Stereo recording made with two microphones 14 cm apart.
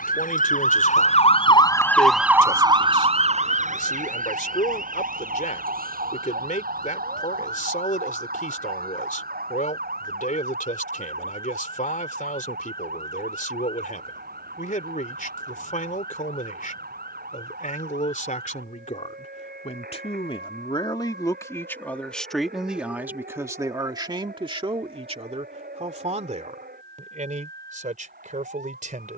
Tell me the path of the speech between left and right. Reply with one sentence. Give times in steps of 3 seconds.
You can hear the speech on the left from 0 s, in the centre from 21 s and on the right from 24 s.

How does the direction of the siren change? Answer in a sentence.
In this clip you hear the siren move to the right.